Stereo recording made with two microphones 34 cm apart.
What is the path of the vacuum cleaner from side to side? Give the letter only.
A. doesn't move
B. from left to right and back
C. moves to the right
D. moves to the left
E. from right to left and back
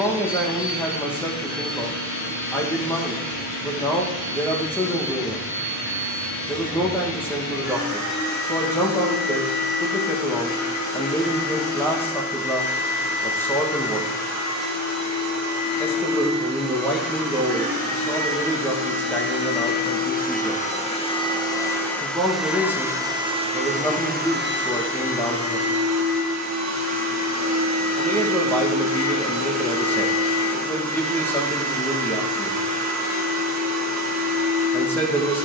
C.